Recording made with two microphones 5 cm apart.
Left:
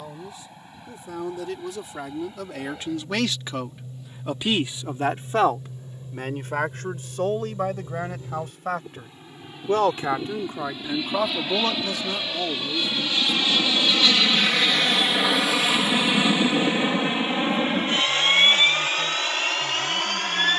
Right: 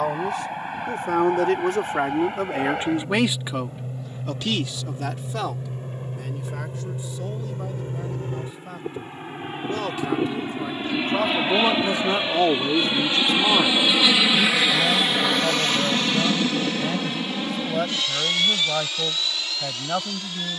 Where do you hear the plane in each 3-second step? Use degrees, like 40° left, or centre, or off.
70° right, 60° right, 50° right, 40° right, 20° right, 20° left, 40° left.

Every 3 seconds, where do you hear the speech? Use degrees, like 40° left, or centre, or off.
50° right, 20° left, 60° left, 20° left, 60° right, 80° right, 80° right.